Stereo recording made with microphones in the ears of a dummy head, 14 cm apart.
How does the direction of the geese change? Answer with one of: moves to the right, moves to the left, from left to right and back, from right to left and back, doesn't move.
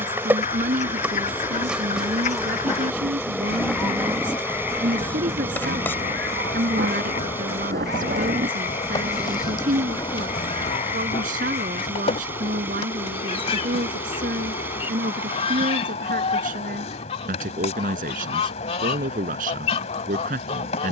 from left to right and back.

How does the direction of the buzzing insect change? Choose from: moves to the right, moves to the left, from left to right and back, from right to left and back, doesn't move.
moves to the left.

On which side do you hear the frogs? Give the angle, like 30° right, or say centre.
40° left.